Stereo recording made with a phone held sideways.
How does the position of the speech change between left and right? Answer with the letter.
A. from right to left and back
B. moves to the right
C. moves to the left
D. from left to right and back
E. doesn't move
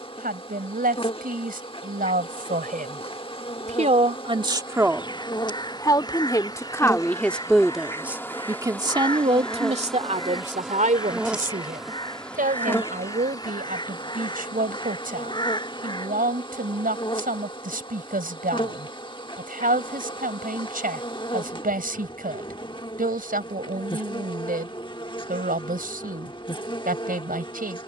A.